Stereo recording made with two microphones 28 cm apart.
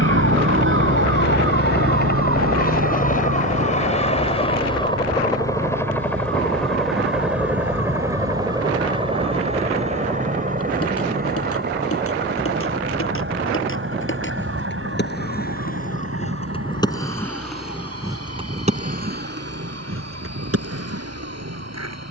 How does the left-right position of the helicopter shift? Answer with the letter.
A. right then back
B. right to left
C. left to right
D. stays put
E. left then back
C.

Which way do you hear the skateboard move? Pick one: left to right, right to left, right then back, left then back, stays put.
left to right.